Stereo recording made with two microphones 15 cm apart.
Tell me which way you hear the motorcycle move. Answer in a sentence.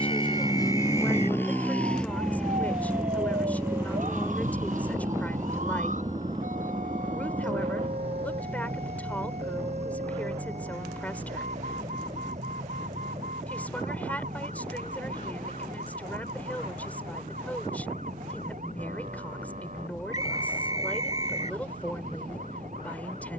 In this clip you hear the motorcycle move from left to right.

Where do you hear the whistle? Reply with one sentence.
In this clip you hear the whistle on the right.